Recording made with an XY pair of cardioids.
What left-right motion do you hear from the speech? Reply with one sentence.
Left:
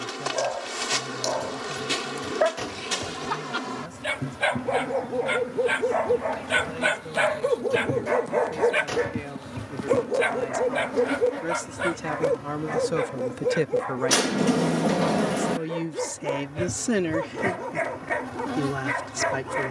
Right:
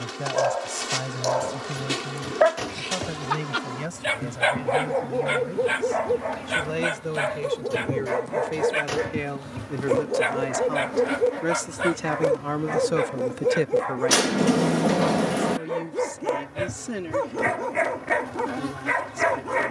In this clip you hear the speech go from the right side to the left.